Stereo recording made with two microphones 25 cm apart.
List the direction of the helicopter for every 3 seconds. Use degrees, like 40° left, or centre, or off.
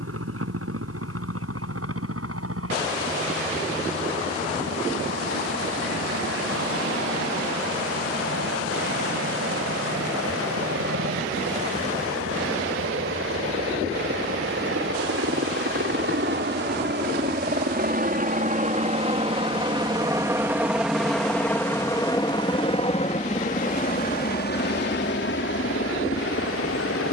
80° right, 80° right, 70° right, 70° right, 60° right, 50° right, 20° right, 20° left, 50° left.